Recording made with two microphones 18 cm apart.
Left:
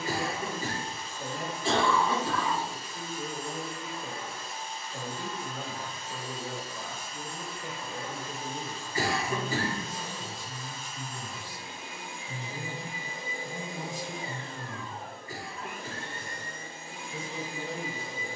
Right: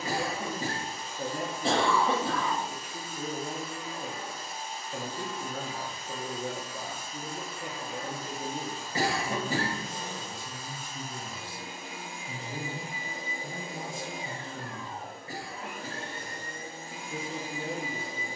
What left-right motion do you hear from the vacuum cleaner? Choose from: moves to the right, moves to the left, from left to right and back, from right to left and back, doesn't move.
doesn't move.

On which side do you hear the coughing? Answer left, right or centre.
right.